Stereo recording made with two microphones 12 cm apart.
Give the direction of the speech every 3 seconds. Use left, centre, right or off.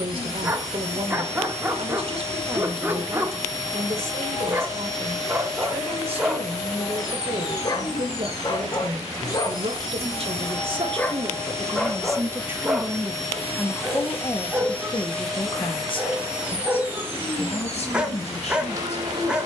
right, right, right, right, centre, left, left.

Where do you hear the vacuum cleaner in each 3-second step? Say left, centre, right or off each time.
left, left, left, left, left, centre, right.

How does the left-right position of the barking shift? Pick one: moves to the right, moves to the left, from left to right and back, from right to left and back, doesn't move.
from right to left and back.